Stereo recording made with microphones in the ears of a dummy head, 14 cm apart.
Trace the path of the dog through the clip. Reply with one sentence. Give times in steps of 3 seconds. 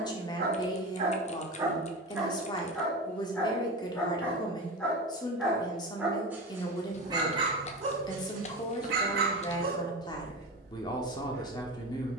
In this clip you hear the dog on the right from 0 s, in the centre from 3 s and on the right from 6 s.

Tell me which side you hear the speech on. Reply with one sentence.
You can hear the speech on the left.